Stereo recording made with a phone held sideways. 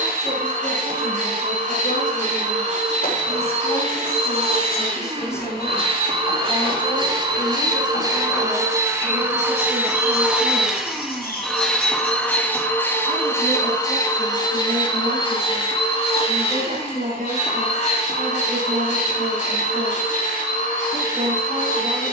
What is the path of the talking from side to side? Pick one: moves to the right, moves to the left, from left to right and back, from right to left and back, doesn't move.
moves to the right.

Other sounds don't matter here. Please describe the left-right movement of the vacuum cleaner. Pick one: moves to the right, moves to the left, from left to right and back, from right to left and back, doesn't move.
moves to the left.